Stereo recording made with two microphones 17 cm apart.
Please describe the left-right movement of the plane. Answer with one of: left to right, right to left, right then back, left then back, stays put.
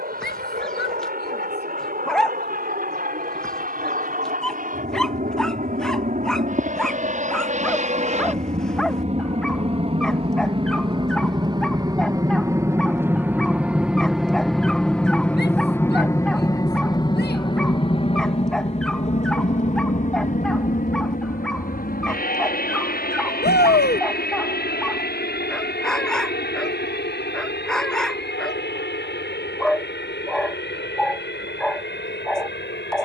right to left.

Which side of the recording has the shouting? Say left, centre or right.
left.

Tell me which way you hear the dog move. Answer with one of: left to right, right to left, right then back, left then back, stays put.
stays put.